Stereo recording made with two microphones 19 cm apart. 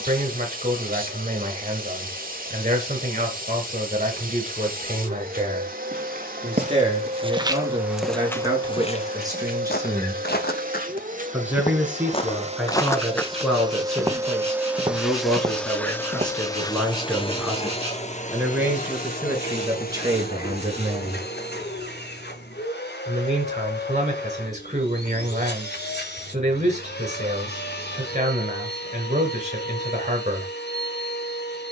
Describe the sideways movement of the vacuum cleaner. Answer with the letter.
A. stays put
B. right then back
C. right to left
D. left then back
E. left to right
C.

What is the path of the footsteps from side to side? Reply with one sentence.
You can hear the footsteps move from right to left and back again.